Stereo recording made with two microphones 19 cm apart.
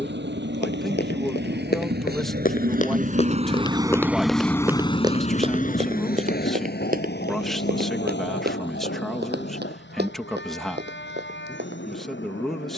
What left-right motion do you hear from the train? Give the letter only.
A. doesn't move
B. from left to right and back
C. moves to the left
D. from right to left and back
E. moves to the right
C.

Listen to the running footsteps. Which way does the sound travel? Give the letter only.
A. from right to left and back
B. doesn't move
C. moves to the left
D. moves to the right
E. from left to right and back
D.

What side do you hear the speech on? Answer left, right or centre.
centre.